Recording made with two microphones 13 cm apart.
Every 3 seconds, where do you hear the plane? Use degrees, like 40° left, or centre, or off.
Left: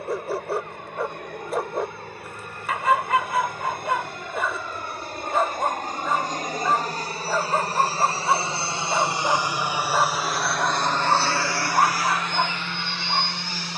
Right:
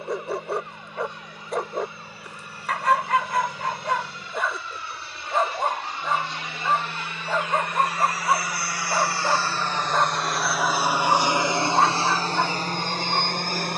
60° left, 60° left, 40° left, centre, 40° right.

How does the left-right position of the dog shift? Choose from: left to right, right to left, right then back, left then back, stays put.
stays put.